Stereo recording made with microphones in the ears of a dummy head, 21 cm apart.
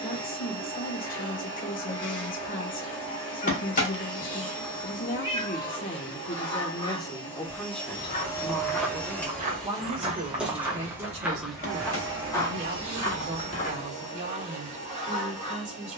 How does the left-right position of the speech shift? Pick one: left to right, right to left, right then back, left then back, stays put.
left to right.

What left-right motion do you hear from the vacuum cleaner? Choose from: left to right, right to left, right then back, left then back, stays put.
left to right.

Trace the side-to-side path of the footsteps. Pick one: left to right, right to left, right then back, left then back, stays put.
right then back.